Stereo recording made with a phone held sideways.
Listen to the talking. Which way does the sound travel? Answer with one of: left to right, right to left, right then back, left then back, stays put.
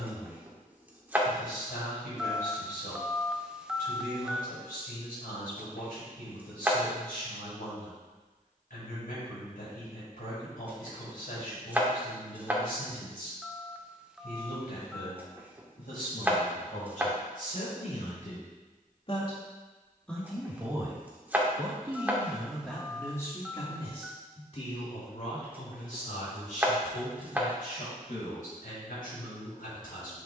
right then back.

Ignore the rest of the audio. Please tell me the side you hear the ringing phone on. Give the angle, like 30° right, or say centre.
10° right.